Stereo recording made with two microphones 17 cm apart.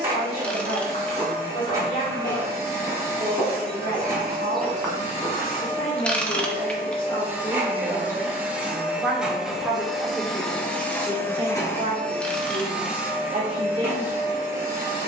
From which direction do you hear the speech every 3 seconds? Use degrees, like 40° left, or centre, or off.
60° left, 50° left, 30° left, 20° right, 30° right.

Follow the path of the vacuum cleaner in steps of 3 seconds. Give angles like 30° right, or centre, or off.
20° right, 20° right, 10° right, 10° left, 10° right.